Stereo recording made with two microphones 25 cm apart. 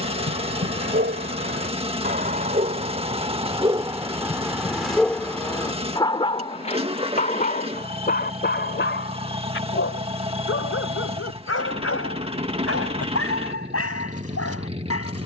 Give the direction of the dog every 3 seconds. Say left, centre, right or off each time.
right, centre, left, left, left.